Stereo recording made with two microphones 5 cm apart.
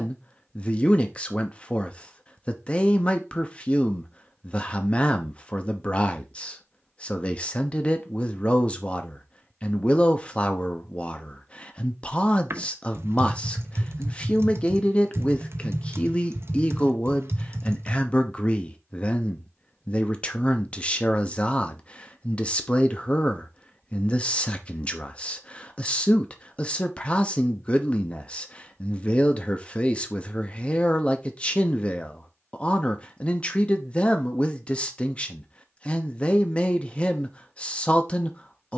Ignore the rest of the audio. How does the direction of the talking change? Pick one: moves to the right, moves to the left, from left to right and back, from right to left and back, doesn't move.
doesn't move.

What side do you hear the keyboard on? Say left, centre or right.
right.